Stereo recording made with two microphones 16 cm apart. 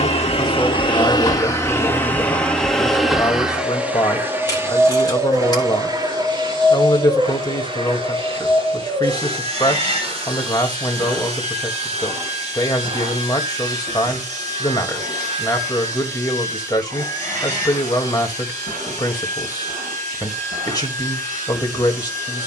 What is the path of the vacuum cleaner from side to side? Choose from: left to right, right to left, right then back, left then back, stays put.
left to right.